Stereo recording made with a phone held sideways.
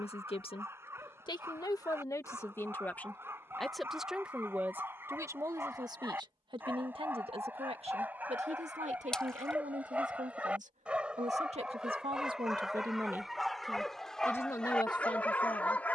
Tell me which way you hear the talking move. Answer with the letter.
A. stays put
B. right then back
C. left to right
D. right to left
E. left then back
B.